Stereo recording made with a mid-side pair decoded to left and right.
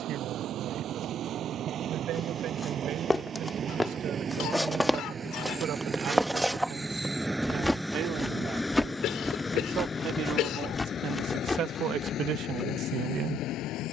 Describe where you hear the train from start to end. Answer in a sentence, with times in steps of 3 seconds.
In this clip you hear the train on the right from 0 s, in the centre from 6 s and on the left from 9 s.